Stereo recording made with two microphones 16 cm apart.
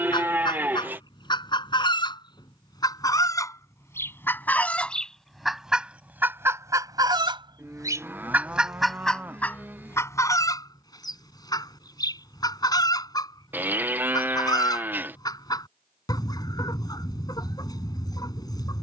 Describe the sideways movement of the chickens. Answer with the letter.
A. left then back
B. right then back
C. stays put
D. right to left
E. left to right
B.